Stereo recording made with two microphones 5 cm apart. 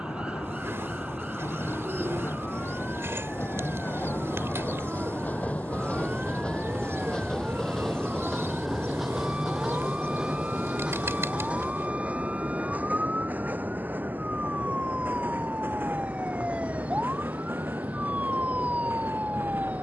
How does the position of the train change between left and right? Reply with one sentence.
You can hear the train move to the right.